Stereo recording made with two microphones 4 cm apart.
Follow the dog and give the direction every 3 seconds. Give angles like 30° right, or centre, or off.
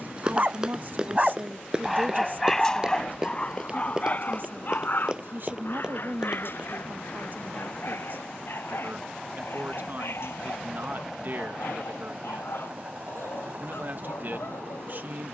10° right, 40° left, 60° left, 70° left, 80° left.